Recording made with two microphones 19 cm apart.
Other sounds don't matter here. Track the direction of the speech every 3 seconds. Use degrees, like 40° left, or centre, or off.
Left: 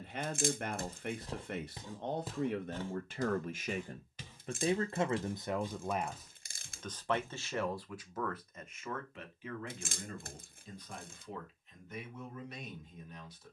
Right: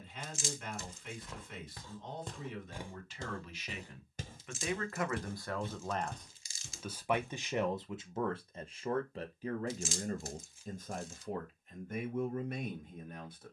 60° left, 30° left, 20° right, 40° right, 50° right.